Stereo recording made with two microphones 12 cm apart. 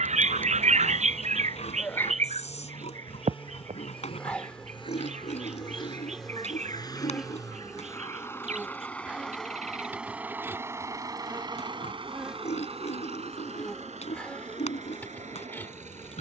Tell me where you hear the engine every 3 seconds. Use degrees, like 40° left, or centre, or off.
50° left, 50° left, 30° left, 20° right, 70° right, 80° right.